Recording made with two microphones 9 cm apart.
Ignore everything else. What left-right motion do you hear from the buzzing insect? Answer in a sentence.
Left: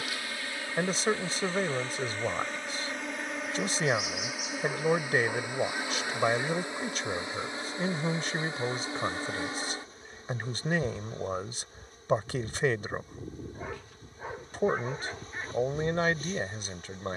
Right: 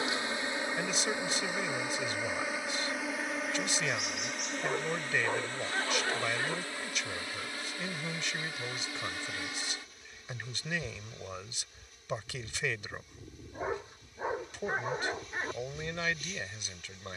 You can hear the buzzing insect move from right to left.